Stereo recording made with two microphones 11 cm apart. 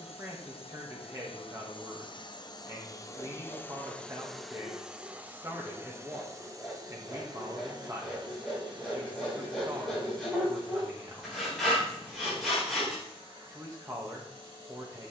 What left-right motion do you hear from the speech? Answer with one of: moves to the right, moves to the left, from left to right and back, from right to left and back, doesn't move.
doesn't move.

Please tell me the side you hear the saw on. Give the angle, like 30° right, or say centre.
centre.